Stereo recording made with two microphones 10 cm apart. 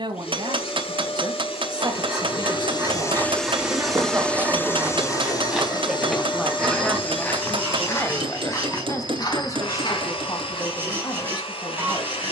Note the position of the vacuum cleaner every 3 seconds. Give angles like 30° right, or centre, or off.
70° left, 20° left, 70° left, 80° left.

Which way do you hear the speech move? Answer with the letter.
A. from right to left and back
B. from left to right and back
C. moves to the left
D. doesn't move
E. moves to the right
C.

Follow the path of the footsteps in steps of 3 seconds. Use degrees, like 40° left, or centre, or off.
off, 20° right, 20° left, 50° left.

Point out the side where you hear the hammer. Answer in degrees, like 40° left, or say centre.
60° right.